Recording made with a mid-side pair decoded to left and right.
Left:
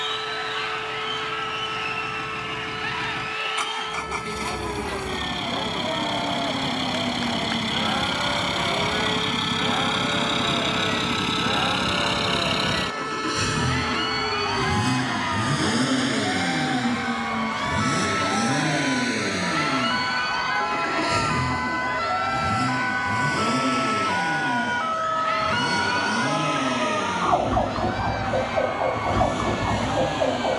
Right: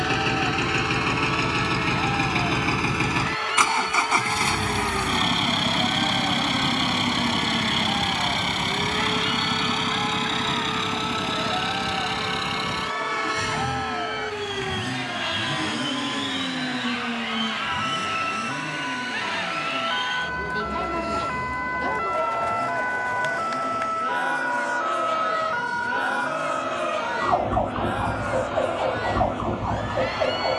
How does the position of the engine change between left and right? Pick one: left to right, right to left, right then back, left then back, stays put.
right to left.